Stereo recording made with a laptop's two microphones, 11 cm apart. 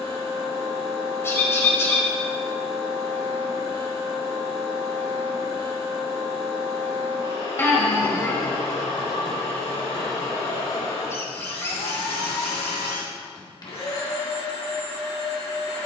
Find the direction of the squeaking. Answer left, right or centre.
left.